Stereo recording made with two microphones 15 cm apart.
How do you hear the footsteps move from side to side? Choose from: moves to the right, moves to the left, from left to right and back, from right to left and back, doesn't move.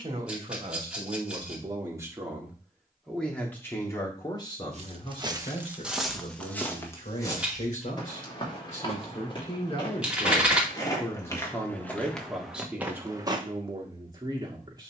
from right to left and back.